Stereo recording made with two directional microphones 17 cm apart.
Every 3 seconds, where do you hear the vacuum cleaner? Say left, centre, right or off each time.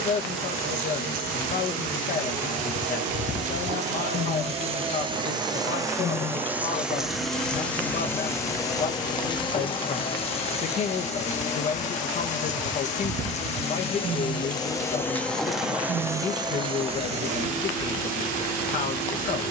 right, right, centre, left, left, right, right.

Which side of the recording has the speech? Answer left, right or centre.
left.